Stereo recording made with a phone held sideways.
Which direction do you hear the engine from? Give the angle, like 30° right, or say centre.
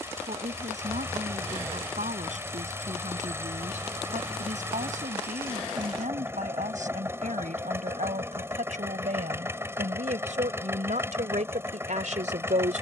20° right.